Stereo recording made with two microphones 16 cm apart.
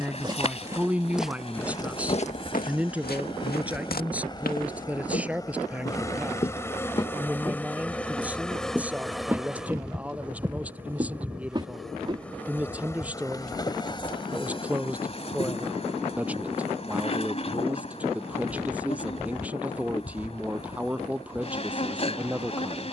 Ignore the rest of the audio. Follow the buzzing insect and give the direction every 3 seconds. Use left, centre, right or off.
left, left, centre, centre, left, left, left, left.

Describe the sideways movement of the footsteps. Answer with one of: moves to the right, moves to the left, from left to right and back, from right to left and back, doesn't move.
from right to left and back.